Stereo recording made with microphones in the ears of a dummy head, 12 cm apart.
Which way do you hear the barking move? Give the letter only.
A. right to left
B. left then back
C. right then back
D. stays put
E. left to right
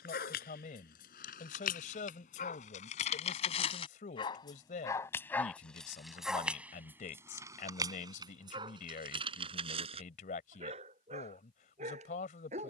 E.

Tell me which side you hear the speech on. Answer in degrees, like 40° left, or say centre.
60° left.